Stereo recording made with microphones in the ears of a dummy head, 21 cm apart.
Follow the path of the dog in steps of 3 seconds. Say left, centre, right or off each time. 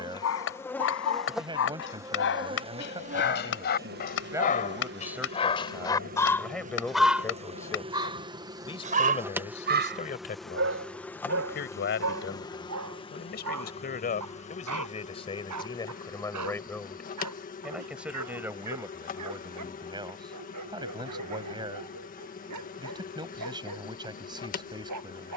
left, left, centre, right, right, right, right, right, right.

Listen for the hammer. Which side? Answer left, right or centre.
left.